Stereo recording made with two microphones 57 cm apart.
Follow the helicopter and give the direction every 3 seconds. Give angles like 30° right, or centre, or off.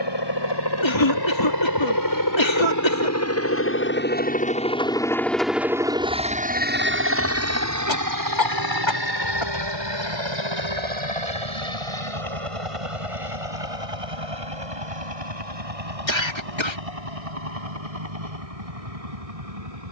40° left, 10° left, 30° right, 50° right, 60° right, 70° right, 70° right.